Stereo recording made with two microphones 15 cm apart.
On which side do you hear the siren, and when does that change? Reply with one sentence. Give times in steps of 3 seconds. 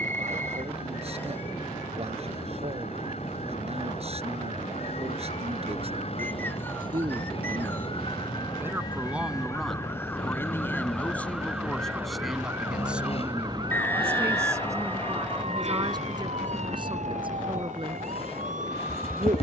In this clip you hear the siren on the left from 0 s, in the centre from 9 s and on the right from 12 s.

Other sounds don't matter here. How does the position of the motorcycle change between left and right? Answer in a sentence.
You can hear the motorcycle stay put.